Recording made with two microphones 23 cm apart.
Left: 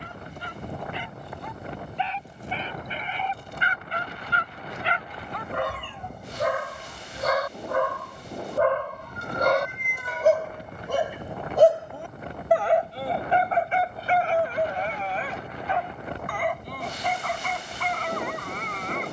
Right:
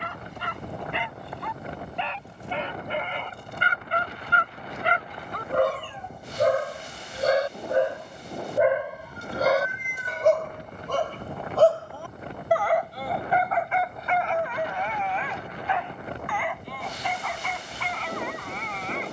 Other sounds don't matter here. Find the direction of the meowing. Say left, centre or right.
left.